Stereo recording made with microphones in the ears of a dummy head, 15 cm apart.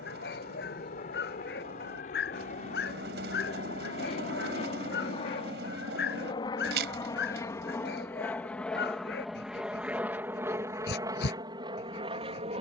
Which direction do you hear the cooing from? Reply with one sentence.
You can hear the cooing on the right.